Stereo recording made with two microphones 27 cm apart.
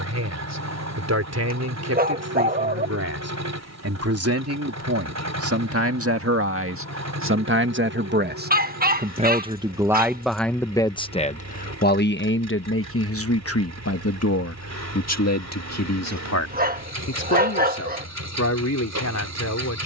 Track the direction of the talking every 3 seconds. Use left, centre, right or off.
right, right, right, centre, left, left, left.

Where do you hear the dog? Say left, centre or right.
right.